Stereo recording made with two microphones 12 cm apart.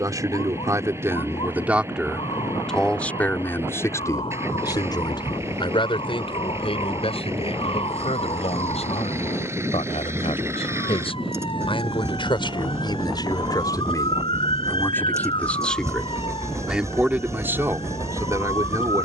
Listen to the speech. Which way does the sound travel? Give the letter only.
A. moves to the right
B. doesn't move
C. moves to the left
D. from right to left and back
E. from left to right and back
D.